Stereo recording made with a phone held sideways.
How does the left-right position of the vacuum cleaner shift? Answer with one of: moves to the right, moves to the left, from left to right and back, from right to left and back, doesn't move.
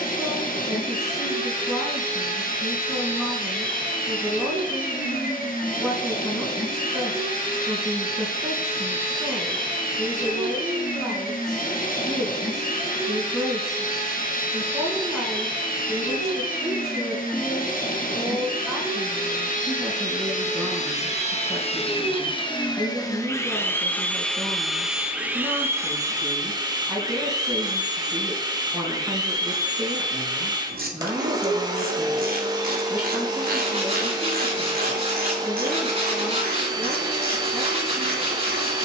moves to the right.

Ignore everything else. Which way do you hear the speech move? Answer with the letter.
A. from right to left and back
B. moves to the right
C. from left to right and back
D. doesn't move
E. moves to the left
D.